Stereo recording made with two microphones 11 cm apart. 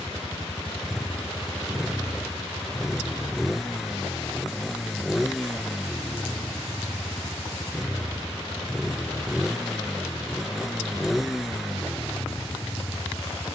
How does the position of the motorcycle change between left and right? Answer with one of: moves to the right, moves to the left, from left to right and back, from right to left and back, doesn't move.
doesn't move.